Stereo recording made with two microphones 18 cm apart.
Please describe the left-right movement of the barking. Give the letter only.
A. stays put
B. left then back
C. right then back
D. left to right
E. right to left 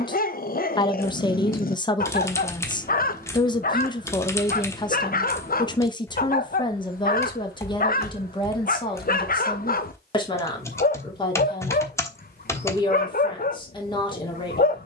A.